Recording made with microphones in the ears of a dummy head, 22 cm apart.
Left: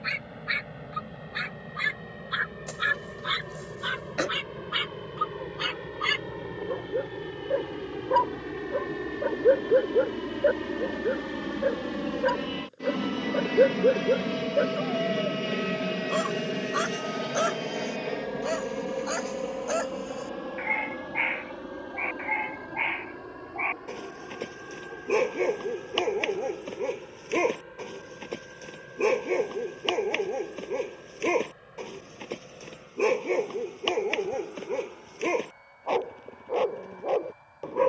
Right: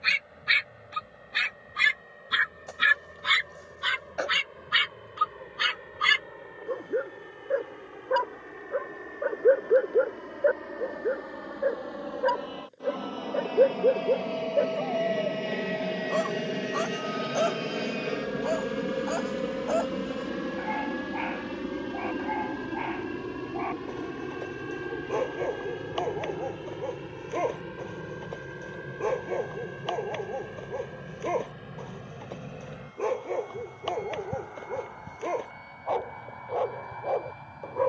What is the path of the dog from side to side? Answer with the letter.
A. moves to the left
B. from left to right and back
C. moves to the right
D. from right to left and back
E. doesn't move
A.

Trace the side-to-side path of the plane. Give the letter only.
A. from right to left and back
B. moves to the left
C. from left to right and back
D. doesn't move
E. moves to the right
E.